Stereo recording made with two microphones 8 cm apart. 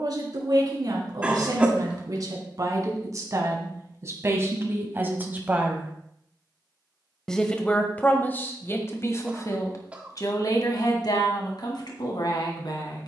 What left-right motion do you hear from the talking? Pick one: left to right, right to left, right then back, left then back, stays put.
right to left.